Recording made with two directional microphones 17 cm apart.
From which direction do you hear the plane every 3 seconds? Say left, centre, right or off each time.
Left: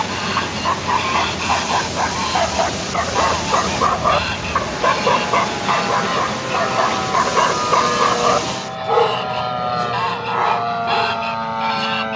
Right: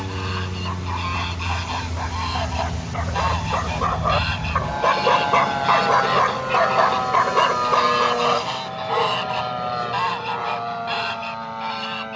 right, right, centre, left.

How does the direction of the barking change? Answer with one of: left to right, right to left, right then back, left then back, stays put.
right then back.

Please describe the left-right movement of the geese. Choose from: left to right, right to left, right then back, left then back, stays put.
right then back.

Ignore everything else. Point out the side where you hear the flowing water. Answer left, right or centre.
left.